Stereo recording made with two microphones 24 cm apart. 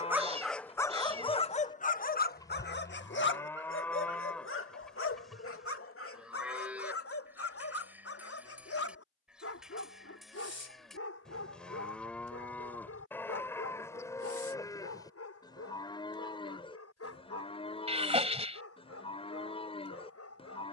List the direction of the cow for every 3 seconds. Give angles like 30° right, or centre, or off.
20° left, centre, 10° right, centre, 10° left, 20° left, 20° left.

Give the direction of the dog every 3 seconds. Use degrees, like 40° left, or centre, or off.
20° left, 60° left, 70° left, 70° left, 70° left, 80° left, 80° left.